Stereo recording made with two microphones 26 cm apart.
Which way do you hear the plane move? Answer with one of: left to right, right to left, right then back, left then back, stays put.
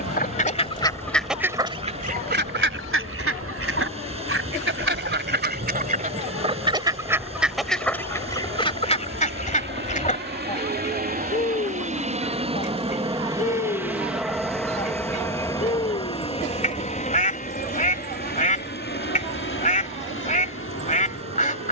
right to left.